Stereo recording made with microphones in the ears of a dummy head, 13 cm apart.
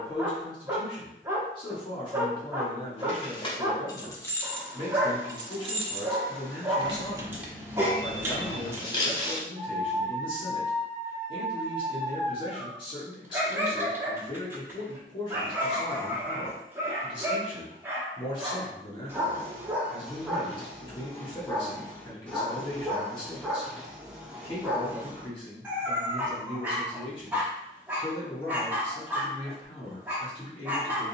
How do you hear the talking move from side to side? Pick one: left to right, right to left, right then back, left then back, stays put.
stays put.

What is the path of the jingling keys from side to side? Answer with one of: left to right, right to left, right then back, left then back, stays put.
right then back.